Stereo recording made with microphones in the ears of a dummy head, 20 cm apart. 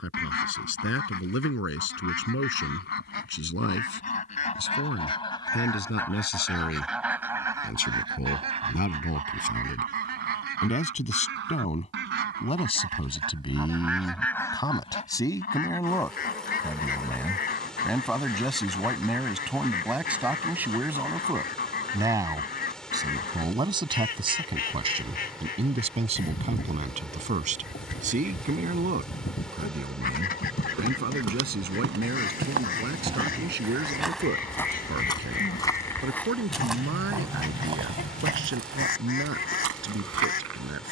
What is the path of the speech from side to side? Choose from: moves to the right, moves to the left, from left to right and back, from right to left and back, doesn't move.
moves to the right.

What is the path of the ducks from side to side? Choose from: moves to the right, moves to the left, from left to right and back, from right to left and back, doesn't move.
from left to right and back.